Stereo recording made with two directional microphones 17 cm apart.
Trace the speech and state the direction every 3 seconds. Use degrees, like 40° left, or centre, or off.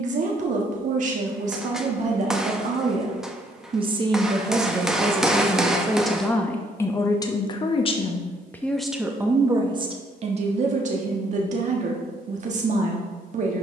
40° right, 20° right, 20° left, 40° right, 50° right.